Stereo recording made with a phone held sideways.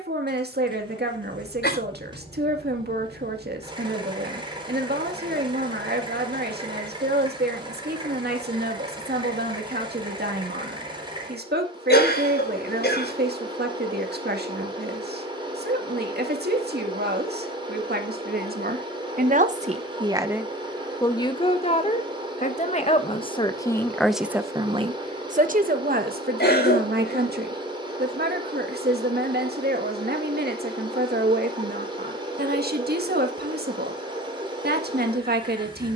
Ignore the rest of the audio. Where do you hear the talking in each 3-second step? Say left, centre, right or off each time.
right, right, right, right, right, right, right, left, right, right, right, right.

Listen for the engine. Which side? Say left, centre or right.
right.